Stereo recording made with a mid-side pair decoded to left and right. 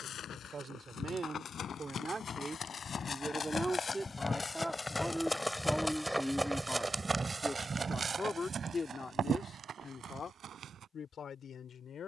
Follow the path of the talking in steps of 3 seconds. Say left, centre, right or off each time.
right, centre, left, left.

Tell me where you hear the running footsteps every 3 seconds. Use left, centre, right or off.
left, left, right, right.